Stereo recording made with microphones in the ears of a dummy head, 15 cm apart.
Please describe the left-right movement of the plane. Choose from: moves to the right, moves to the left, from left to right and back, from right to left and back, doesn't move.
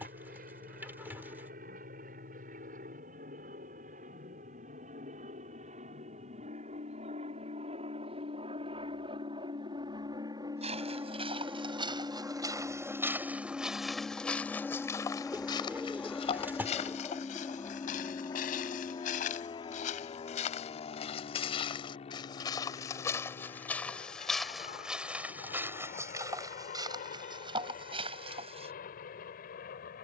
moves to the left.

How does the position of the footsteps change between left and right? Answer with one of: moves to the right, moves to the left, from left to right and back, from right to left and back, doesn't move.
from right to left and back.